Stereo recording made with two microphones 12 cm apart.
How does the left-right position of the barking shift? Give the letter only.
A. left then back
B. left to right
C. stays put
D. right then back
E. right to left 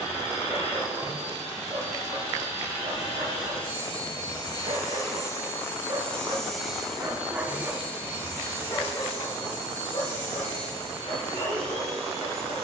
E.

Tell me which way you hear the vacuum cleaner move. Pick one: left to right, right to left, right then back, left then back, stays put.
left to right.